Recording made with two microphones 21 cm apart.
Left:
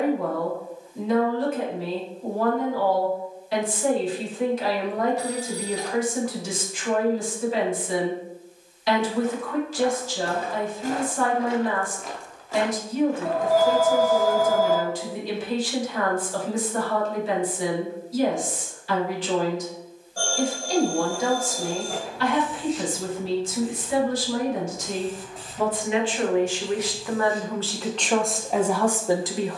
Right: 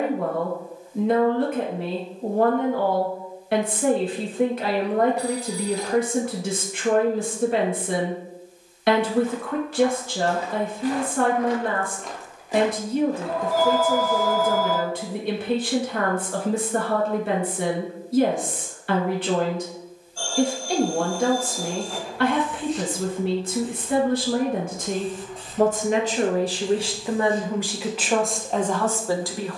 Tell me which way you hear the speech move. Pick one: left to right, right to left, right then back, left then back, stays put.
right to left.